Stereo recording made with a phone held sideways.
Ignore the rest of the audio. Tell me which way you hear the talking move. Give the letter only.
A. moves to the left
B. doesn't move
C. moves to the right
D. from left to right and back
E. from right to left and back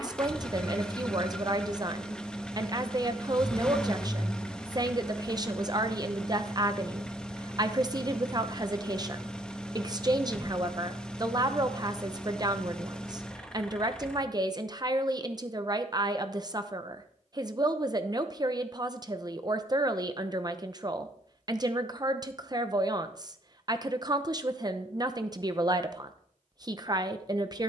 B.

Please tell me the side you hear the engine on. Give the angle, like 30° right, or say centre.
10° left.